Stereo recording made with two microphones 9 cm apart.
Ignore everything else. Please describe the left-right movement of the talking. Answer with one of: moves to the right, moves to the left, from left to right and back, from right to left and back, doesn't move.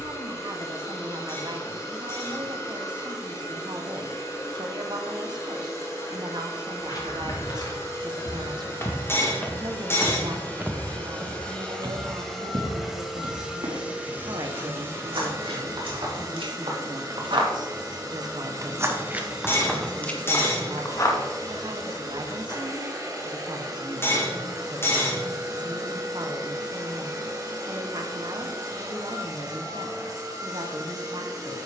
doesn't move.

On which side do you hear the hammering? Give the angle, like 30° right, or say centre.
30° left.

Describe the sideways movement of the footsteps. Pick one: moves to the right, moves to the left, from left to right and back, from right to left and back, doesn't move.
from left to right and back.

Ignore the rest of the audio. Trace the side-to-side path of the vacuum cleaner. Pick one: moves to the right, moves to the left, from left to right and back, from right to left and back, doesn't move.
moves to the right.